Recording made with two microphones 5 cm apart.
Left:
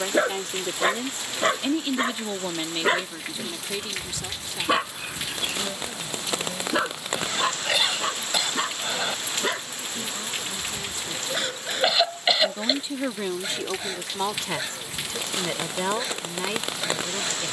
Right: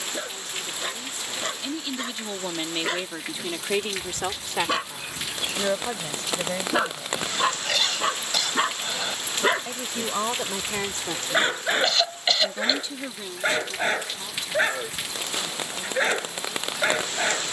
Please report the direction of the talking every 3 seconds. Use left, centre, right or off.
left, right, right, right, left, left.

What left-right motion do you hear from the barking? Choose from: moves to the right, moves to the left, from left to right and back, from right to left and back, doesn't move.
moves to the right.